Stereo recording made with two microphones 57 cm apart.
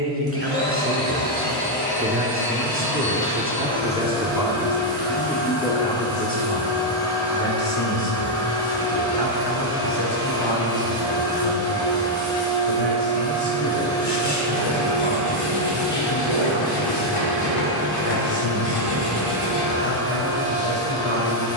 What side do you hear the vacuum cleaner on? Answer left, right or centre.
centre.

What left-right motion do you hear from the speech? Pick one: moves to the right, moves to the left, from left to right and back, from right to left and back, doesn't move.
moves to the left.